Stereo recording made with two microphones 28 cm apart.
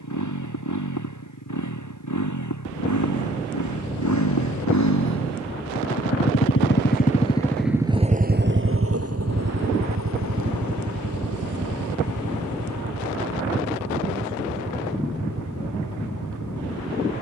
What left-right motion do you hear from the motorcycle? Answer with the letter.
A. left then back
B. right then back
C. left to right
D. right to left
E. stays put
C.